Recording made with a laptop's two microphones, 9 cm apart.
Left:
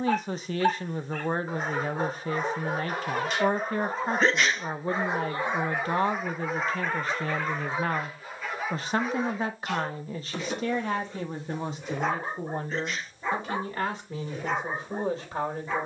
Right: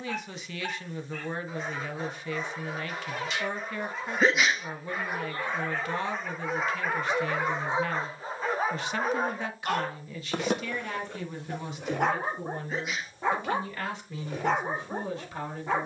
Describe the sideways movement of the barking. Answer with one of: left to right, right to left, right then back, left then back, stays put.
left to right.